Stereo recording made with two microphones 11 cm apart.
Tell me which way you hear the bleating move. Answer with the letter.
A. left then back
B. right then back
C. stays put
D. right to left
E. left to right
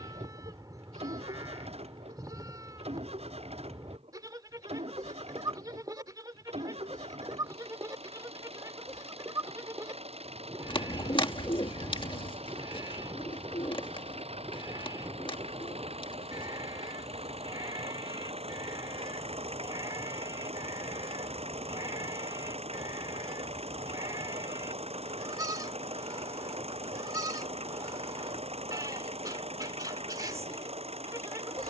C.